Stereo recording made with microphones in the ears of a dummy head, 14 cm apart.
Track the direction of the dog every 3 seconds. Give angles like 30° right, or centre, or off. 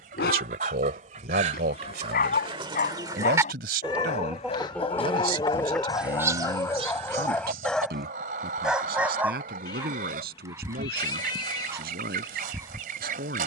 60° left, 40° left, 10° left, 20° right, 20° right.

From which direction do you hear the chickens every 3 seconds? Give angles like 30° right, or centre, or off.
40° right, centre, 50° right, 60° right, 60° right.